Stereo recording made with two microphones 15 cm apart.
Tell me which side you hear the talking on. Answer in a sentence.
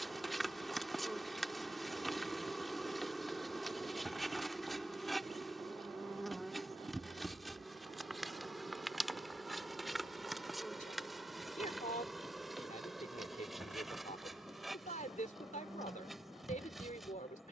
In this clip you hear the talking on the left.